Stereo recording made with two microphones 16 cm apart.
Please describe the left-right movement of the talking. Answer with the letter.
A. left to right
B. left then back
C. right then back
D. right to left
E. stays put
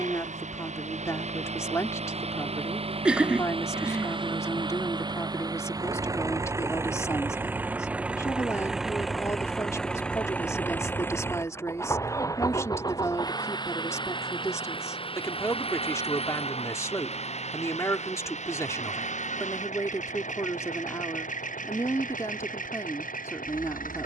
E.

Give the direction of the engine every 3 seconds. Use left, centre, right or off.
right, right, centre, centre, left, left, left, left.